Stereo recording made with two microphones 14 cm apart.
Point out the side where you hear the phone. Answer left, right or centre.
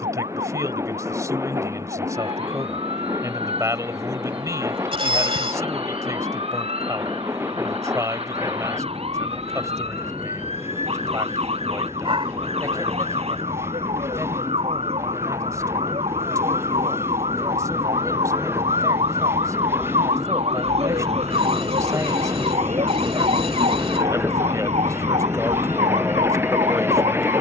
right.